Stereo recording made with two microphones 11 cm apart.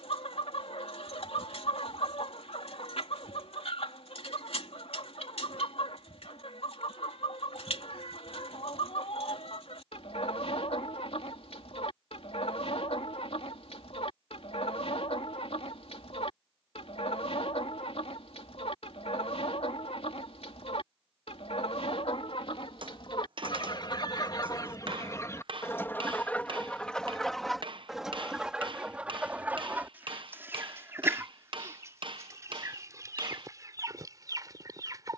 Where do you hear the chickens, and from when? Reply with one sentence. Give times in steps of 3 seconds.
In this clip you hear the chickens on the left from 0 s, in the centre from 27 s and on the right from 30 s.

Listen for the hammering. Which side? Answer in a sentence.
You can hear the hammering on the right.